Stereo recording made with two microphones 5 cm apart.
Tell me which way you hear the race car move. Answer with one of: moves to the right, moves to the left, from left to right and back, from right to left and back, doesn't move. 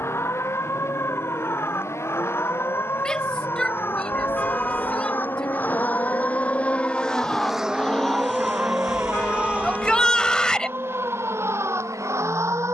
moves to the right.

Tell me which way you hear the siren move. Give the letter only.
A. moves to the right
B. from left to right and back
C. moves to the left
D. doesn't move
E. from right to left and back
A.